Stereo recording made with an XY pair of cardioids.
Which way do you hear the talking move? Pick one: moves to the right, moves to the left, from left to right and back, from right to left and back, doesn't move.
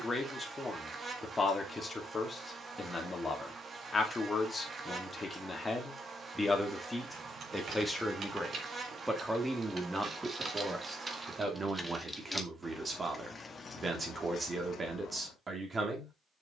moves to the right.